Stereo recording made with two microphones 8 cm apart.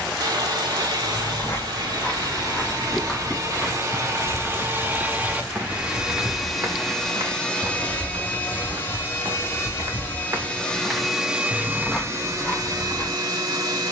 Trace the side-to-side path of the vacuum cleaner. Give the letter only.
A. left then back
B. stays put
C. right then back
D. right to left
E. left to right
A.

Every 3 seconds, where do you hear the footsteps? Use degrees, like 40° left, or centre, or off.
20° left, 10° right, 50° right, 30° right, 20° left.